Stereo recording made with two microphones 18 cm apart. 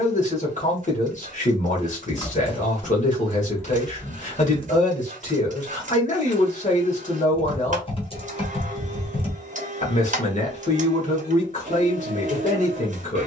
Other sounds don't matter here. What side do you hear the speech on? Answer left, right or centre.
left.